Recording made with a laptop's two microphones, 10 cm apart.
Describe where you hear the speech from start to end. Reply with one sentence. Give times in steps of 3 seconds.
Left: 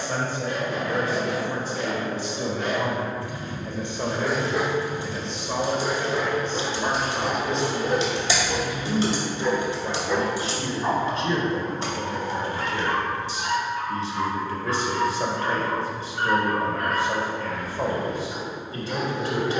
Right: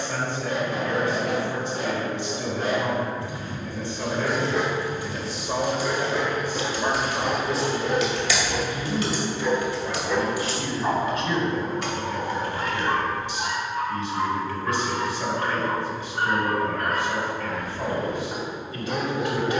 You can hear the speech on the left from 0 s, in the centre from 3 s and on the left from 9 s.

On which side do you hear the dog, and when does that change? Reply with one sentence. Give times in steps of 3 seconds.
You can hear the dog on the right from 0 s, in the centre from 3 s, on the left from 6 s, in the centre from 9 s and on the right from 12 s.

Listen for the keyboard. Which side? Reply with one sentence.
You can hear the keyboard on the left.